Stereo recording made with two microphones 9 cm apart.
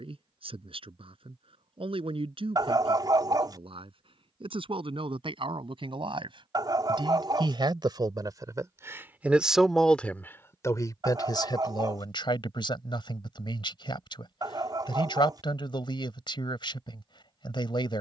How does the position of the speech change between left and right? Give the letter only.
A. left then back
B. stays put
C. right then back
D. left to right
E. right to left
E.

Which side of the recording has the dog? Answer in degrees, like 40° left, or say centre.
50° right.